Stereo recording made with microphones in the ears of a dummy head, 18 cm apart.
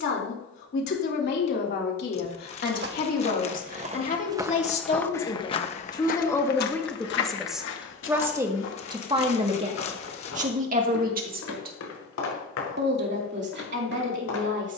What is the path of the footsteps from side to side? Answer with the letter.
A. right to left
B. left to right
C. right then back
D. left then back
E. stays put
A.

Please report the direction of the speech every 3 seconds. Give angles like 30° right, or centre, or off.
60° left, 40° left, centre, 40° right, 60° right.